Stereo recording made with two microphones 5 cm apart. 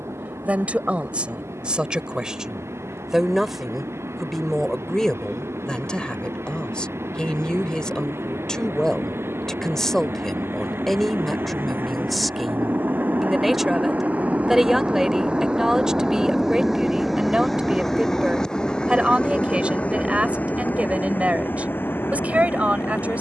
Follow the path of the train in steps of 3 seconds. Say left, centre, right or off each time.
right, right, right, right, right, centre, left, left.